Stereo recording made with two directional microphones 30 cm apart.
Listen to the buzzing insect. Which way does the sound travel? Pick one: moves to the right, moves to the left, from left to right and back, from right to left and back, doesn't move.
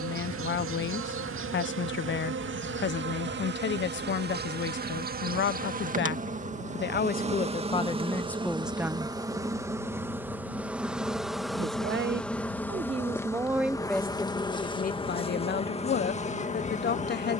moves to the left.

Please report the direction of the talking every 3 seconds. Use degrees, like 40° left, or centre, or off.
40° left, 40° left, 20° left, 30° right, centre, 30° left.